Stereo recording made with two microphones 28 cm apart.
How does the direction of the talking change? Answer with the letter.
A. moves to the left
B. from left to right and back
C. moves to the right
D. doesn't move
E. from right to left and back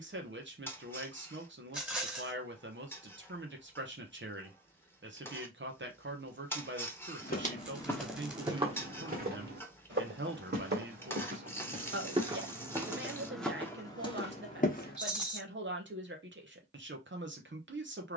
D.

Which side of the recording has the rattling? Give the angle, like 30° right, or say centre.
centre.